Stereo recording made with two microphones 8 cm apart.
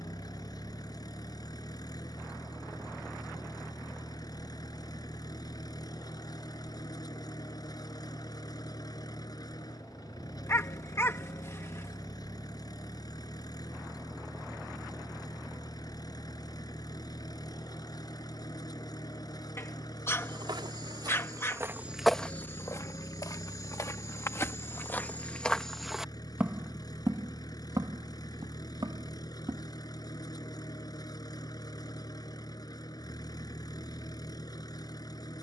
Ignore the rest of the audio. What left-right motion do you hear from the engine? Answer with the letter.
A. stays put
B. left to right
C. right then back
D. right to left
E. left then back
A.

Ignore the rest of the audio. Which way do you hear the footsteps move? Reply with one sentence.
In this clip you hear the footsteps go left and come back.